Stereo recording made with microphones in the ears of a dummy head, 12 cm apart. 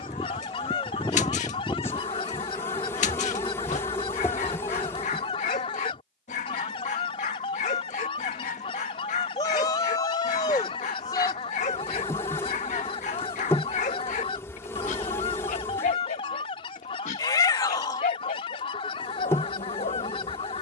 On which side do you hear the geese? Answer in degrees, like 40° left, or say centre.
40° left.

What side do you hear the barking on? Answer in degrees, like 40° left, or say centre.
60° left.